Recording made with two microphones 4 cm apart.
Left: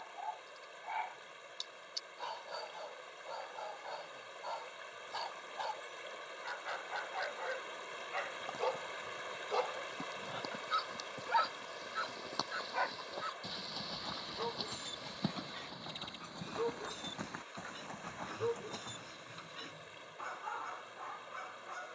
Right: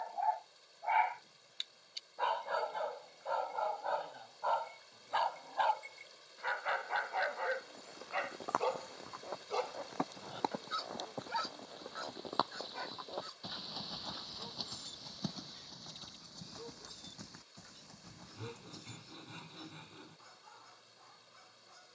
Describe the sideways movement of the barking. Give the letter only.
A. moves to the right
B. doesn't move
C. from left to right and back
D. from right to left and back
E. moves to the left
E.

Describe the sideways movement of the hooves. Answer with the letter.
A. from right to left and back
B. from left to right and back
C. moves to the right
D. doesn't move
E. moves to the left
E.